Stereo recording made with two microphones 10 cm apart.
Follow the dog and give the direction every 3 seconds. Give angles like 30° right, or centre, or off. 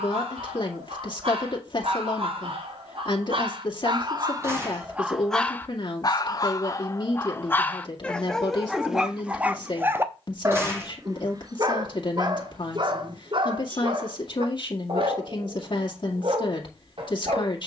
70° right, 30° right, 20° left, 30° right, 50° right, 60° right.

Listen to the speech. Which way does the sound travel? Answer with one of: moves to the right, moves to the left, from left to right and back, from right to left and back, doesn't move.
doesn't move.